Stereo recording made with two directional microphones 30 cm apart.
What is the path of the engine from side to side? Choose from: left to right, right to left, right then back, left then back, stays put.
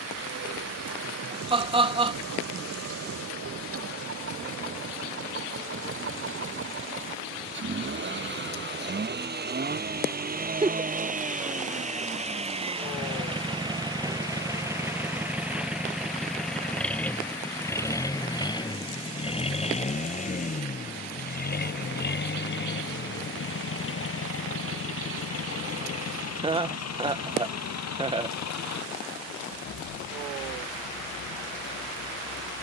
right to left.